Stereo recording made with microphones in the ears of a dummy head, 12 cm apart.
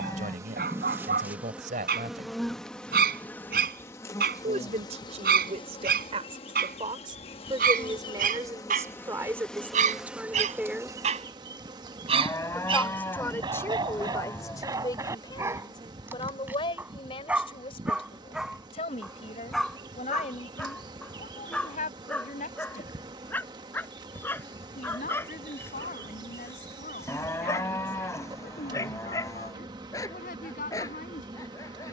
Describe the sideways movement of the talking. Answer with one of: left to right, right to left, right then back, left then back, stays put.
right to left.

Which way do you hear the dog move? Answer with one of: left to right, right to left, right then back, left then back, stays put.
right to left.